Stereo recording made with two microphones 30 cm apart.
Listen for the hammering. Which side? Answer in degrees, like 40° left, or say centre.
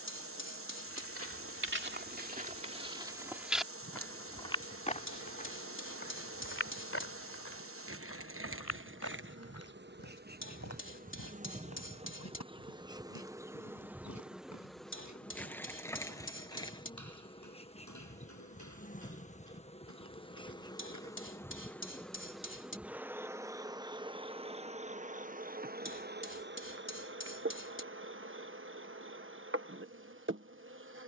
40° left.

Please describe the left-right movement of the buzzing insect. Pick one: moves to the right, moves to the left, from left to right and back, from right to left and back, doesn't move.
from right to left and back.